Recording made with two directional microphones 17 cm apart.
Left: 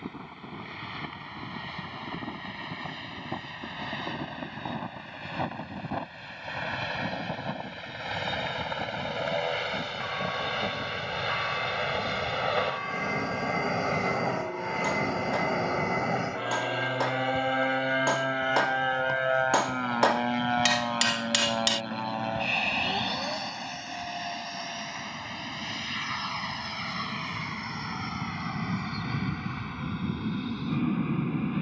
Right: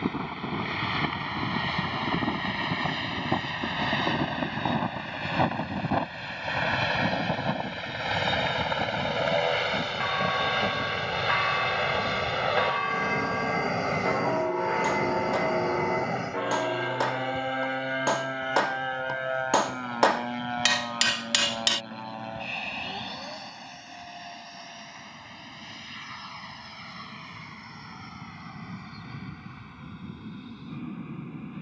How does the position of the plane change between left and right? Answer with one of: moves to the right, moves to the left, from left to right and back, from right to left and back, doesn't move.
moves to the left.